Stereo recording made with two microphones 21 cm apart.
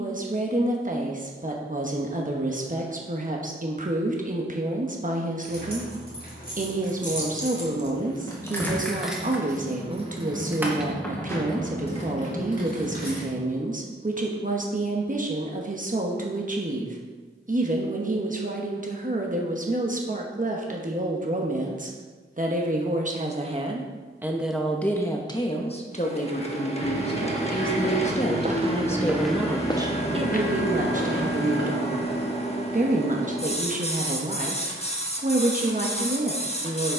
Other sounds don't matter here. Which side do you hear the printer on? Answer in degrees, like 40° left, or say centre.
30° left.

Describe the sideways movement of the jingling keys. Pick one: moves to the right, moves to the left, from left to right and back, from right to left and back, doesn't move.
from left to right and back.